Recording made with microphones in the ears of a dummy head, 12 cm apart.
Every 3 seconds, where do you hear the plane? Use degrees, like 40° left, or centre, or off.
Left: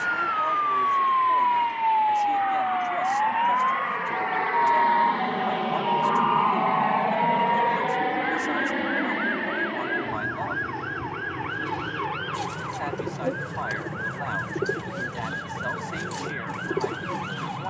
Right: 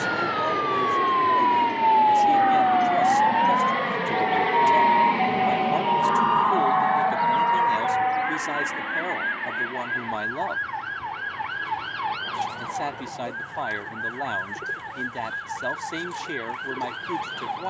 60° right, 30° right, 20° left, 50° left, 60° left, 70° left.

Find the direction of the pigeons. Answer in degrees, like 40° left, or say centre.
50° left.